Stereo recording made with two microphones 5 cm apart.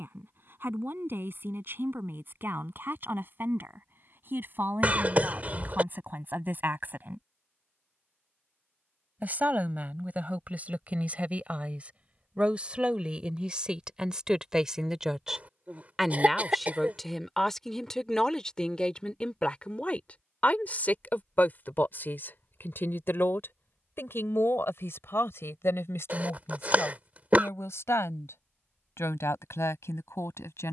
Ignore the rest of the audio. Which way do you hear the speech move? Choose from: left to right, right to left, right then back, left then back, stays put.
right to left.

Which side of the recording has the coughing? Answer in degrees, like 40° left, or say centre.
30° right.